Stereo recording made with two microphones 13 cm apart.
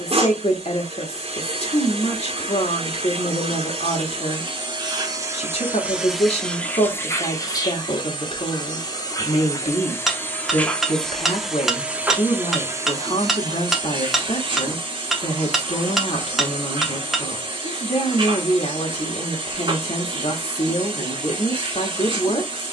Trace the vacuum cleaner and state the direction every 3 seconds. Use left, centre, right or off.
right, right, left, centre, right, right, right, right.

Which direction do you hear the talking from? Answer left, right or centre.
left.